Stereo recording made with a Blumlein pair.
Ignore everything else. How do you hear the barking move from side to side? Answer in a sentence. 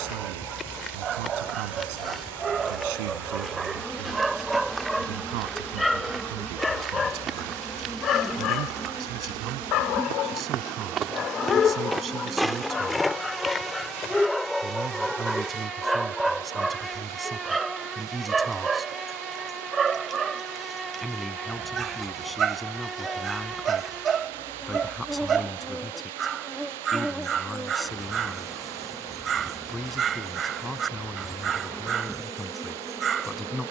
In this clip you hear the barking go left and come back.